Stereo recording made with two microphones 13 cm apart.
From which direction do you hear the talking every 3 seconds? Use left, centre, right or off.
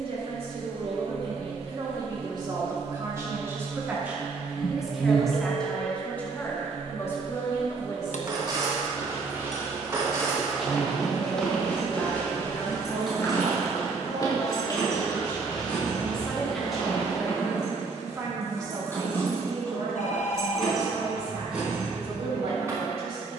right, centre, left, left, left, centre, right, right.